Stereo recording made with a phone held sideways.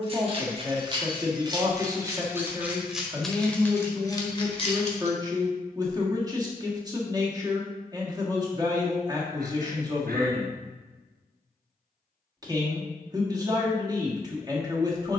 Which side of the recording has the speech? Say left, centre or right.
right.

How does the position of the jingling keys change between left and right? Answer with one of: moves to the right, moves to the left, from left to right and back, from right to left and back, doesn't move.
moves to the left.